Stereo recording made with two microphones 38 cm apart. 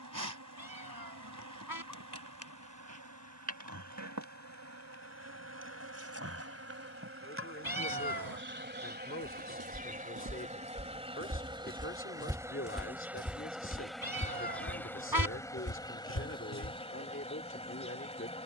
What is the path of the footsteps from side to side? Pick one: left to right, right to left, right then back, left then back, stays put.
right to left.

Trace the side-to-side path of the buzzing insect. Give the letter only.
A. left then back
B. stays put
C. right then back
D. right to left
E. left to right
D.